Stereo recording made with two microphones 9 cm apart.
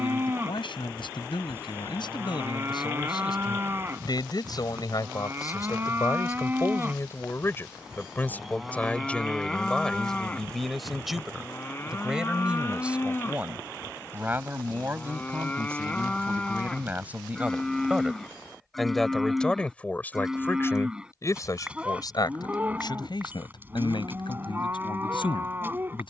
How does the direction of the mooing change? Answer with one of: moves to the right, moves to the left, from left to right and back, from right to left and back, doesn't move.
from right to left and back.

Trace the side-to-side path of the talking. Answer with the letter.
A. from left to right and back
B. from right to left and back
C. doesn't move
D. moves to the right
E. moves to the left
A.